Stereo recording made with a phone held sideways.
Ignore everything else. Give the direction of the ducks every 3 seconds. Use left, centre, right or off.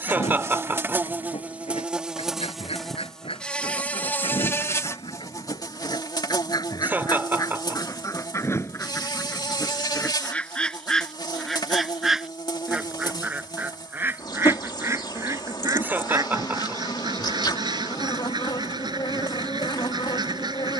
left, left, left, centre, centre, right, right.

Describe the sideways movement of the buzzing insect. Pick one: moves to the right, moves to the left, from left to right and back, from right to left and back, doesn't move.
moves to the left.